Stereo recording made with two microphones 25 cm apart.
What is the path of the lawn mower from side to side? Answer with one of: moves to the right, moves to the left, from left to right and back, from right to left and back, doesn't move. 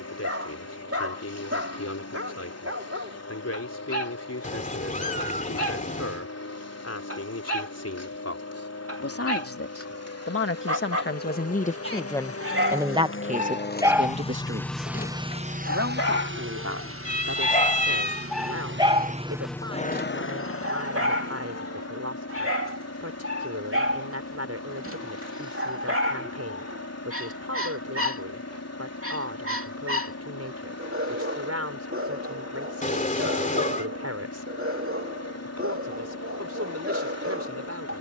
from left to right and back.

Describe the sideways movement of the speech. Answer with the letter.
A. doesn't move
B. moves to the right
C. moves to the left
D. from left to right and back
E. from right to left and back
B.